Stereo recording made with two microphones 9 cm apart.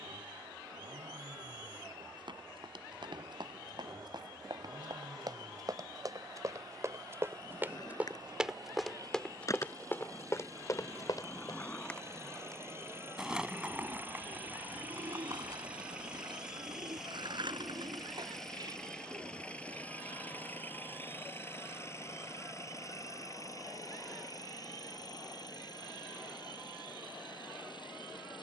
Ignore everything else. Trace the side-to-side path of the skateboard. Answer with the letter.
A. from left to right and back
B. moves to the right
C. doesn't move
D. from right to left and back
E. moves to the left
B.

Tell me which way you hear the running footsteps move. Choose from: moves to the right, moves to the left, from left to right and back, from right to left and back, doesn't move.
moves to the left.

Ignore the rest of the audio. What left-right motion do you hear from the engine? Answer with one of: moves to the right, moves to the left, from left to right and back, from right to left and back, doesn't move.
moves to the left.